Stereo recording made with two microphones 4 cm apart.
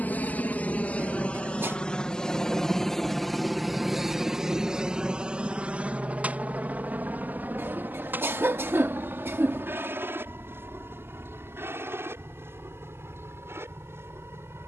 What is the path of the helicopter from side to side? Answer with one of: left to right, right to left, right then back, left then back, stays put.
left to right.